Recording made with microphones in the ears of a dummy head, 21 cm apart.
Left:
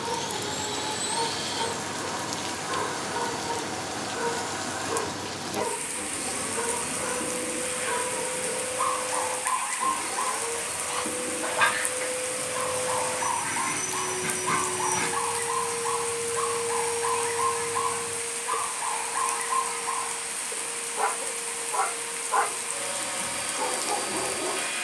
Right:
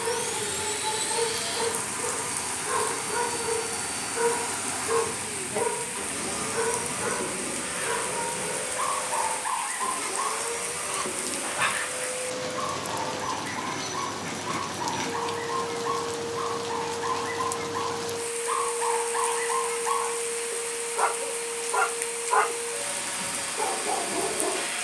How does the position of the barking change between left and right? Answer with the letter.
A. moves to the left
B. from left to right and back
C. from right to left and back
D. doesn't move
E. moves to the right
C.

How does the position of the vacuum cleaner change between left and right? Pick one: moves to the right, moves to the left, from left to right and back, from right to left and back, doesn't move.
from right to left and back.